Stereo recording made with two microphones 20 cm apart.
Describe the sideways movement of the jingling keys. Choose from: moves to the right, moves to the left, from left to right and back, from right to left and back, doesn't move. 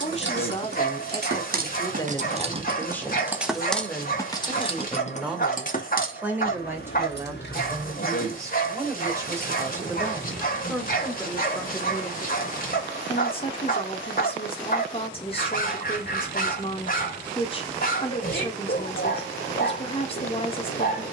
moves to the left.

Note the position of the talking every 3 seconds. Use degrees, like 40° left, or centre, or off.
20° left, centre, 10° right, centre, 30° left, 30° left, 30° left.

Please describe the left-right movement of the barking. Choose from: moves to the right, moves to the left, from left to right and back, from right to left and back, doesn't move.
doesn't move.